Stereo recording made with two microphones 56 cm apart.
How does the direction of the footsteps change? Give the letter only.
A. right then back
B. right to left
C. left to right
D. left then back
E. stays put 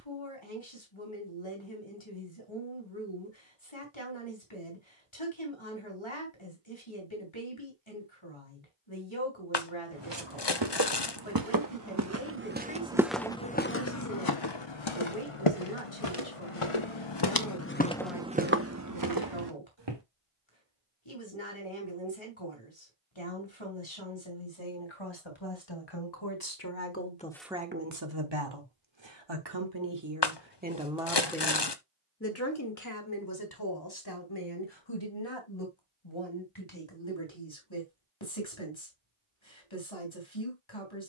D.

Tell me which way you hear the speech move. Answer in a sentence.
You can hear the speech go right and come back.